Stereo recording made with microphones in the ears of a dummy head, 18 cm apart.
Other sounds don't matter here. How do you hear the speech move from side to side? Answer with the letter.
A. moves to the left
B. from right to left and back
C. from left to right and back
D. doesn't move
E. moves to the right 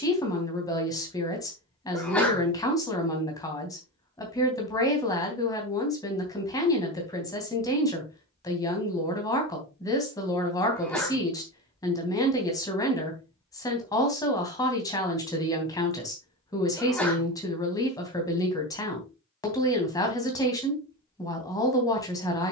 D.